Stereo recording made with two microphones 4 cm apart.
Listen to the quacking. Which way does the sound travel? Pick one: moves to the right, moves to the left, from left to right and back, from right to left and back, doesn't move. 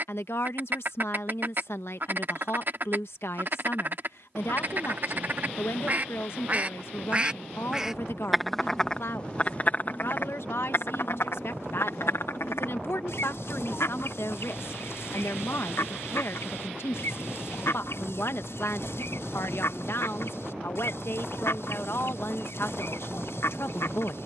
moves to the left.